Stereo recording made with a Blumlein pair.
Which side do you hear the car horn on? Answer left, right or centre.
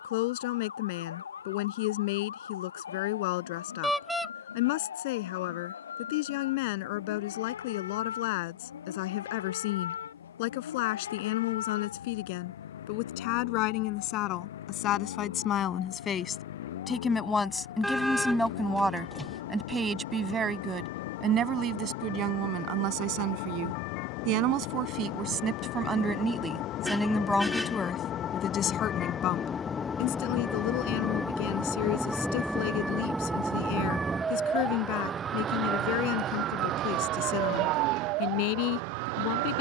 centre.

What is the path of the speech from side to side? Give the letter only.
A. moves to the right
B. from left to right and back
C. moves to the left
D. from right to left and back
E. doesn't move
B.